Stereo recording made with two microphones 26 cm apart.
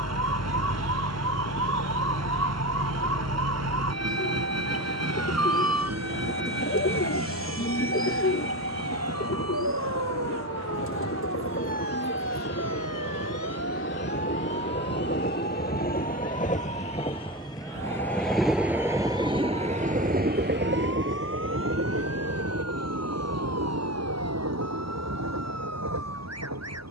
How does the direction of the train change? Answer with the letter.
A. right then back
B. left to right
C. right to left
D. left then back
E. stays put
B.